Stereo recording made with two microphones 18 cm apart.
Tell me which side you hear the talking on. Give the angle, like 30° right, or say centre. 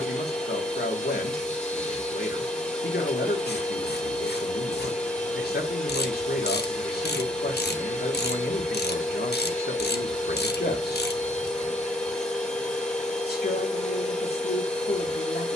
60° left.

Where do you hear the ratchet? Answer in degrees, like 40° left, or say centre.
60° left.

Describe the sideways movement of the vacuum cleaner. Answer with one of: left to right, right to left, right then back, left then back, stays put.
stays put.